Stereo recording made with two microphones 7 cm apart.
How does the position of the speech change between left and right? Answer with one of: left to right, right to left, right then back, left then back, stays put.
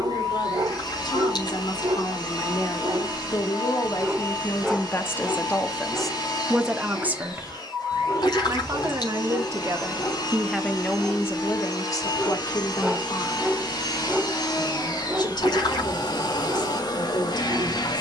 right then back.